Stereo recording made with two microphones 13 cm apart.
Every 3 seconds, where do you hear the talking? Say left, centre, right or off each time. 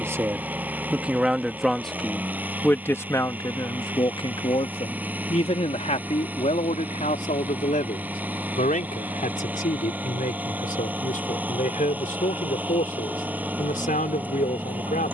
centre, left, left, left, left.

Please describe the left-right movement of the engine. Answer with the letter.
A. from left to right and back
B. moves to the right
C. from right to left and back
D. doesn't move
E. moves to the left
D.